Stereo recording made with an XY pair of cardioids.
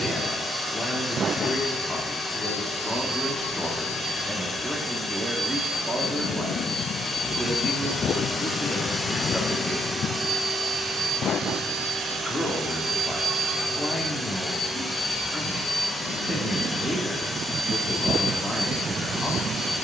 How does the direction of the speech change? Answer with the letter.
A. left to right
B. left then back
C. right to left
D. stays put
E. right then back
E.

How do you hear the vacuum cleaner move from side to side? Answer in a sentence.
You can hear the vacuum cleaner move from left to right and back again.